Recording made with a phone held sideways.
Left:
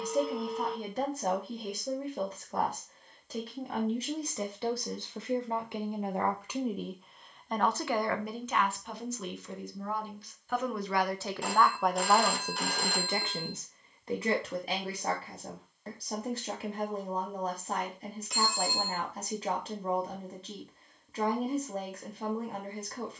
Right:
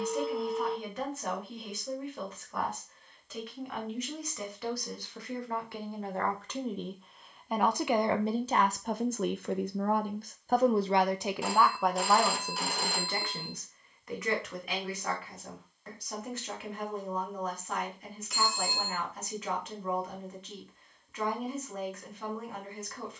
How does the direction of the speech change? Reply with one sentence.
You can hear the speech move from left to right and back again.